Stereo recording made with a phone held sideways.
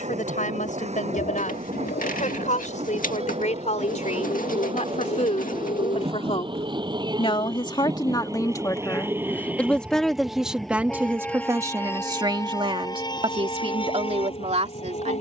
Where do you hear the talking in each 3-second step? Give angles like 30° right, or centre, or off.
70° left, 60° left, 40° left, 10° right, 40° right.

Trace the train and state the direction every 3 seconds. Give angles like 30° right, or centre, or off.
50° right, 50° right, 30° right, centre, 30° left.